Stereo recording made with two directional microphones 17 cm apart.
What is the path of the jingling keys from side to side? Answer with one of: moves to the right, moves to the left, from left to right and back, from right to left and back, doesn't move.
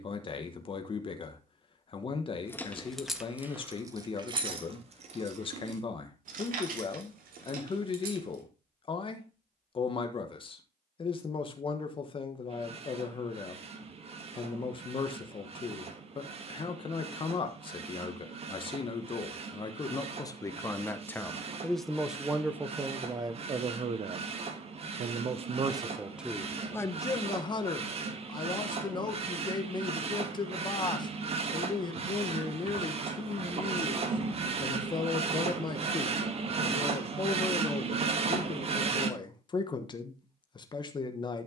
moves to the right.